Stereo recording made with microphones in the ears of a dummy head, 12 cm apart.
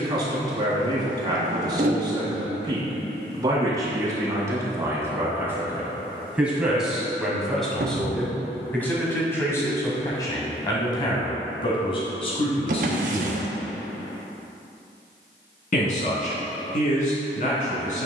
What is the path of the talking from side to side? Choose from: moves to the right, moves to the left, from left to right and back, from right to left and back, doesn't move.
moves to the left.